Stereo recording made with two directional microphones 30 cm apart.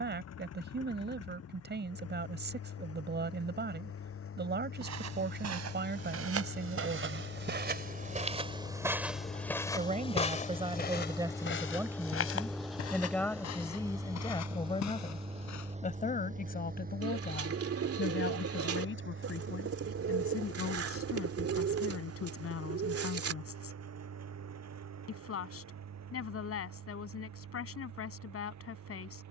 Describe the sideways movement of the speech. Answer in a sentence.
You can hear the speech go from the right side to the left.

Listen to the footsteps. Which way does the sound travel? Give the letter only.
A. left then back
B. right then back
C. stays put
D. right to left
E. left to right
D.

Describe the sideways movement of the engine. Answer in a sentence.
In this clip you hear the engine move to the right.